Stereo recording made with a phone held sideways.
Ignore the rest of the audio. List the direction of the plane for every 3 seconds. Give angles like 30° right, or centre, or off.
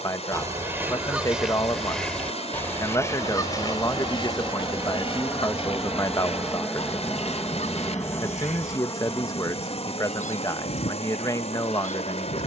40° right, 20° right, 10° left, 40° left.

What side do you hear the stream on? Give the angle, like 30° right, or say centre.
50° left.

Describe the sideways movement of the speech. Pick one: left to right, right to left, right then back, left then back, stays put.
stays put.